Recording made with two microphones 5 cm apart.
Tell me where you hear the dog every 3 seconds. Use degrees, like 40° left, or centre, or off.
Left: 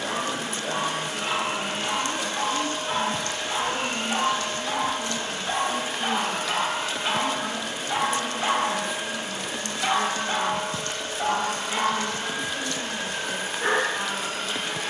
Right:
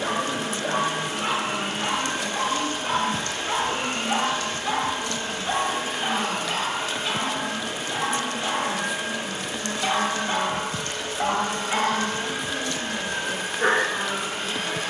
60° right, 30° right, 20° left, 20° right, 50° right.